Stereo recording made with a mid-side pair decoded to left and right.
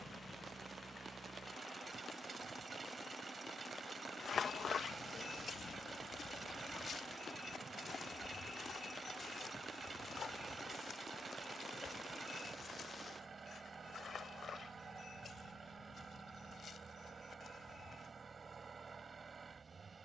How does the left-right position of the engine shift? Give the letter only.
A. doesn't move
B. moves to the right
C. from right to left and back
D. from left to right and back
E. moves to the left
A.